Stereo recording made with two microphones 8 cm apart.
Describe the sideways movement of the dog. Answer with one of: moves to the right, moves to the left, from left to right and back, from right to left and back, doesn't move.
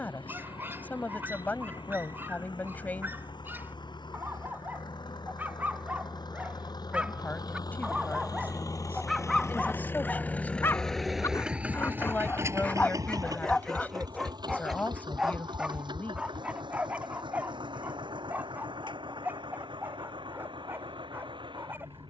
from right to left and back.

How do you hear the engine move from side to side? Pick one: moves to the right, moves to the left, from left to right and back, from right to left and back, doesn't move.
moves to the right.